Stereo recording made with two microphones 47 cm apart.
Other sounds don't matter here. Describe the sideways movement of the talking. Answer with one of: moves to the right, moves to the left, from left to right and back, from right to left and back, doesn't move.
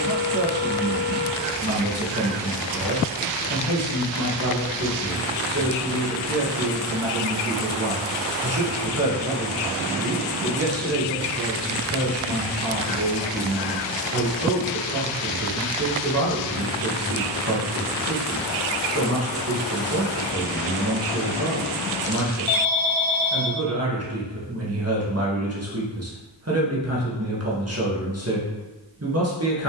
doesn't move.